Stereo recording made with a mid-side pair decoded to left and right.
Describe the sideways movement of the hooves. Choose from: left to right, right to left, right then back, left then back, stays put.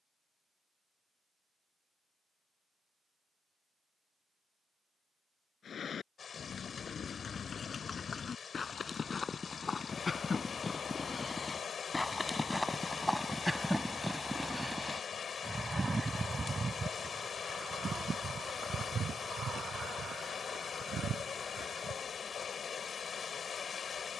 left to right.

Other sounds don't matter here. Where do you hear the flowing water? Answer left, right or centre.
left.